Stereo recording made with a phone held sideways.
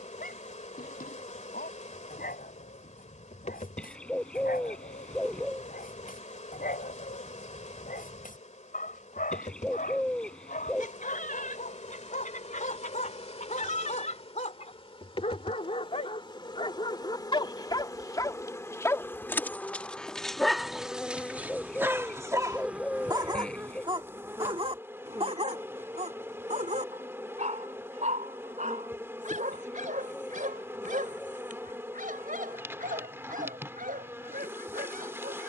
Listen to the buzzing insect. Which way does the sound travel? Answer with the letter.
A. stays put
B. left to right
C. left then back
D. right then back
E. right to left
B.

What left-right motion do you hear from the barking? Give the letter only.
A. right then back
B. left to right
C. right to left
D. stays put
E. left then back
B.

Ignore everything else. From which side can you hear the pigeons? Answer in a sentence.
You can hear the pigeons in the centre.